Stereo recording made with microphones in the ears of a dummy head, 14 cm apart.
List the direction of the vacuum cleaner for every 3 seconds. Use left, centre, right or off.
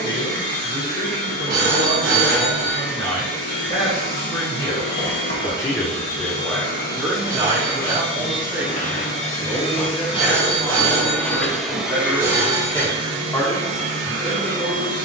left, left, left, left, right.